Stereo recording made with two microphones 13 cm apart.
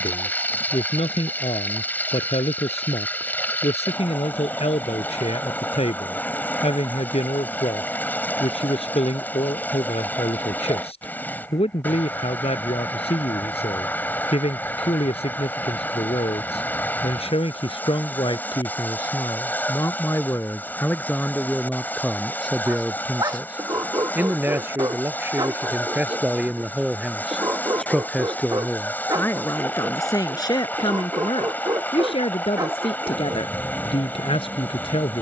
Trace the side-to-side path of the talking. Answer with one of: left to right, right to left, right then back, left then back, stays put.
right then back.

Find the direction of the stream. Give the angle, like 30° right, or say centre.
10° left.